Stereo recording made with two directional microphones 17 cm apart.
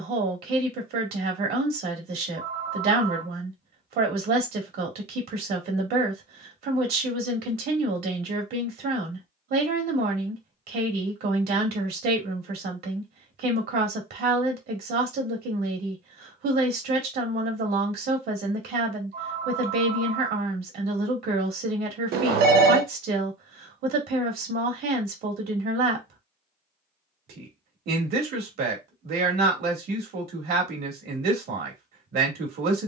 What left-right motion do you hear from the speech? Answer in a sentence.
You can hear the speech stay put.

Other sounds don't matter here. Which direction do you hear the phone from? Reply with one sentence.
You can hear the phone on the right.